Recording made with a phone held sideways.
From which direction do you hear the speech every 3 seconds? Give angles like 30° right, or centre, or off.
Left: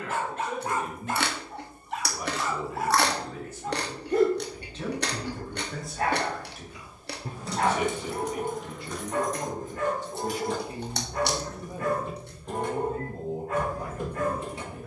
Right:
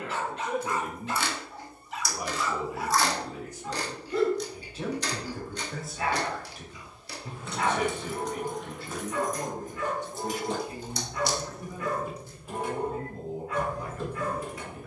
20° right, 10° right, 10° left, 30° left, 40° left.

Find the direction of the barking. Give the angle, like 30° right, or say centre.
50° left.